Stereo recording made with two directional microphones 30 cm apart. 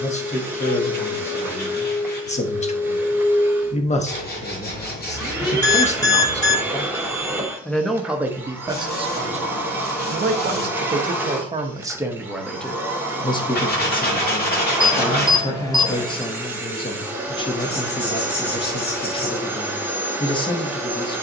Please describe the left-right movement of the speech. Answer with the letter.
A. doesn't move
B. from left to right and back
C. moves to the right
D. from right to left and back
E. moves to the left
B.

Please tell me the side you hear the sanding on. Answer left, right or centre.
left.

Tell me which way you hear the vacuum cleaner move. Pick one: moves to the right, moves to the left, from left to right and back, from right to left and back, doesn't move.
doesn't move.